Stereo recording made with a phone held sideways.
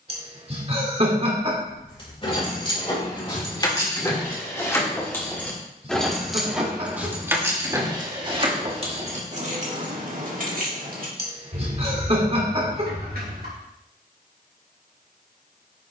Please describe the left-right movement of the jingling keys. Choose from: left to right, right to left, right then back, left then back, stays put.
left to right.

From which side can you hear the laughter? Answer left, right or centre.
right.